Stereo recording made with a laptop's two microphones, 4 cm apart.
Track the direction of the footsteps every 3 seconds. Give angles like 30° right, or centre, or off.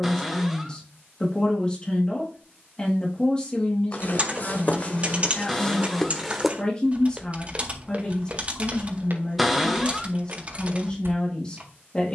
off, 30° left, 30° right, 60° right.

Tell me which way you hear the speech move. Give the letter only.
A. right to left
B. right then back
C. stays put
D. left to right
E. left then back
C.